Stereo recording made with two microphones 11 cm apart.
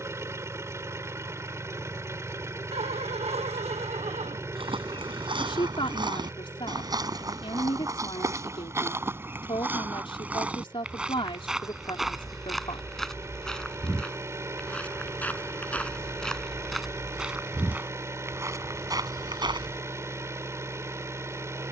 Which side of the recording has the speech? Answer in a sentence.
In this clip you hear the speech on the left.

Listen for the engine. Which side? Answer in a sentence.
In this clip you hear the engine on the right.